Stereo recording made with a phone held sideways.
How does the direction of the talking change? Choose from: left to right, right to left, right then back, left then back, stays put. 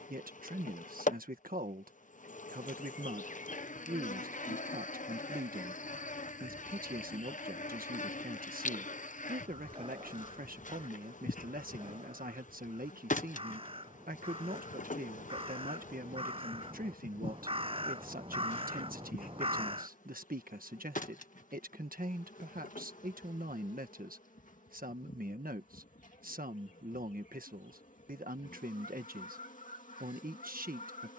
stays put.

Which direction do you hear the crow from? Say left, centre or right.
right.